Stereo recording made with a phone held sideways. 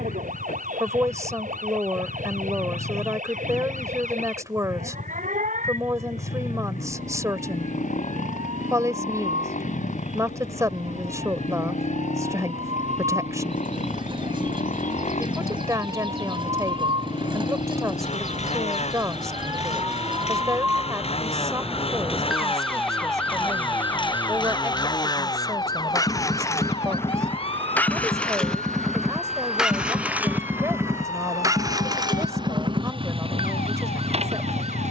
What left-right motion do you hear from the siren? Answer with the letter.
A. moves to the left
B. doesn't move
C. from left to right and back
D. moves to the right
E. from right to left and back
A.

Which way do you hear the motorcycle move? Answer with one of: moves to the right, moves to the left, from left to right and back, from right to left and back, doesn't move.
moves to the right.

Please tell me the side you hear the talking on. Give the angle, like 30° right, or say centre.
20° right.